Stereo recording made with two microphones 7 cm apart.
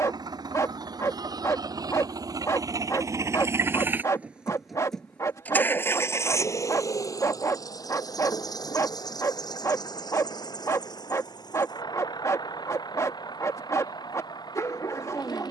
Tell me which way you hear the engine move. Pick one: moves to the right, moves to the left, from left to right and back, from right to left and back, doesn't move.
moves to the left.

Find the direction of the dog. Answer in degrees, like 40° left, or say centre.
50° left.